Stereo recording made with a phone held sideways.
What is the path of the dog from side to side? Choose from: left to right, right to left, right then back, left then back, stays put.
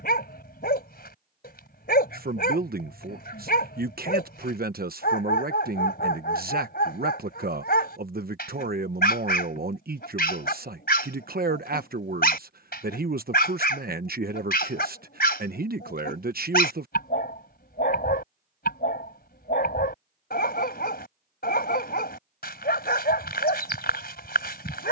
stays put.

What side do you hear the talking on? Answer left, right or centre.
right.